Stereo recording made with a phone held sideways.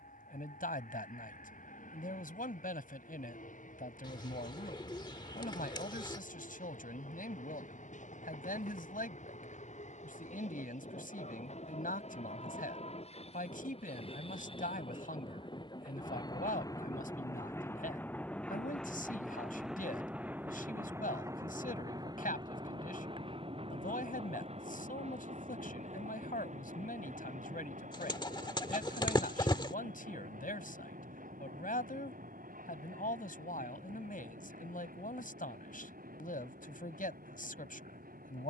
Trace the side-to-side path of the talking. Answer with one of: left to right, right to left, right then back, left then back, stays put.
stays put.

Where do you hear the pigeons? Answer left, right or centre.
left.